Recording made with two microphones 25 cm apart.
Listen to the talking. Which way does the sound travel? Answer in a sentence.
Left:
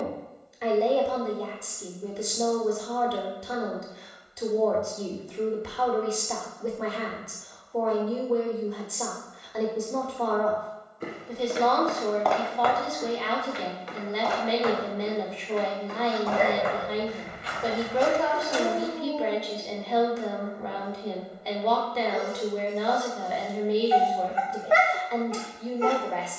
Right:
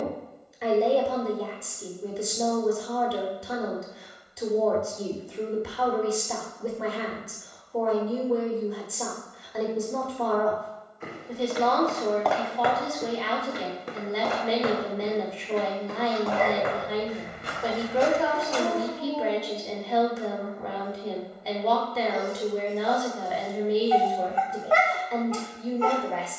In this clip you hear the talking stay put.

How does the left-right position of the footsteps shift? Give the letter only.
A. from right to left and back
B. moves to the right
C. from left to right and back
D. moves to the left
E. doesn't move
C.